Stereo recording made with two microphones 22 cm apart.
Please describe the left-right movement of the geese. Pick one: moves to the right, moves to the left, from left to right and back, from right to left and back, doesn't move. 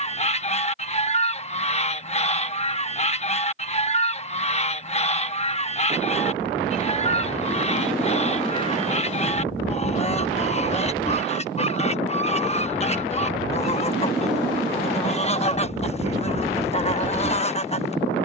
doesn't move.